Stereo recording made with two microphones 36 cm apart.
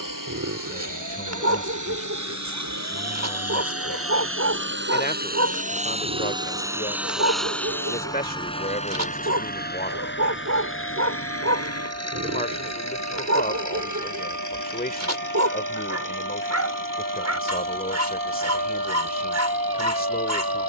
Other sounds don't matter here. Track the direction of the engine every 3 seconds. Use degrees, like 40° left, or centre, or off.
60° right, 30° right, centre, 30° left, 50° left, 60° left, 60° left.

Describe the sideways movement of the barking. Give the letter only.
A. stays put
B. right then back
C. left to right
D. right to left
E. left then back
A.